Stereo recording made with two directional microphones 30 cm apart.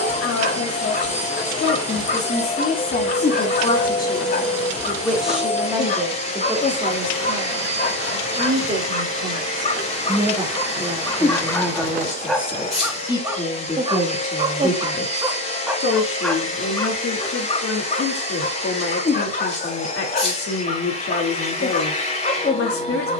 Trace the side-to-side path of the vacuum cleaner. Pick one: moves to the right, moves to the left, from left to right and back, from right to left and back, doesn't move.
doesn't move.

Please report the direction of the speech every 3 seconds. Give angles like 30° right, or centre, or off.
40° left, 10° left, 20° right, 10° right, 20° left, 50° left, 50° left, 50° left.